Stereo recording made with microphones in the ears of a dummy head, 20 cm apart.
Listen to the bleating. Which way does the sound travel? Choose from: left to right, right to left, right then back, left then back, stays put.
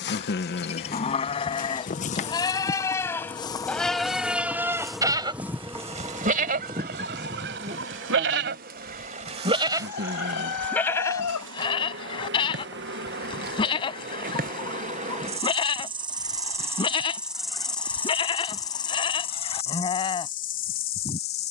right then back.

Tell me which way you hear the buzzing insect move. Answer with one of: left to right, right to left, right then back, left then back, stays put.
right then back.